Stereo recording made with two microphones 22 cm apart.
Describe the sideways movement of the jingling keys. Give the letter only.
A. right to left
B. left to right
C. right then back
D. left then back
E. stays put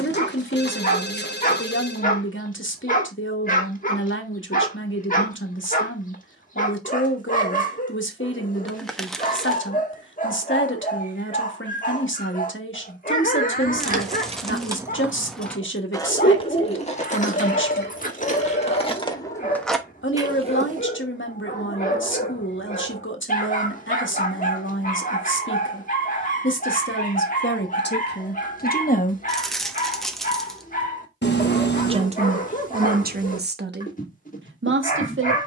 D.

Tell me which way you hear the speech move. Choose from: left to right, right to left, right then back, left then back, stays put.
left to right.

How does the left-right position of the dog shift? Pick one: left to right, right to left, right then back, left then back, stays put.
stays put.